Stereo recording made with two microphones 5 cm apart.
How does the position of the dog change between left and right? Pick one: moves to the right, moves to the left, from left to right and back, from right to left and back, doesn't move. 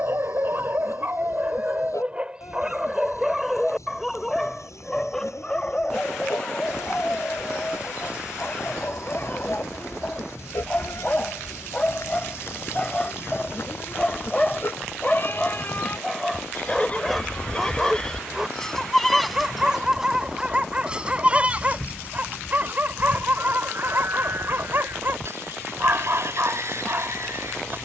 from right to left and back.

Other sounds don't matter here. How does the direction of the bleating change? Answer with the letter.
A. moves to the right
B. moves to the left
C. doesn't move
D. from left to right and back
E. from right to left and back
A.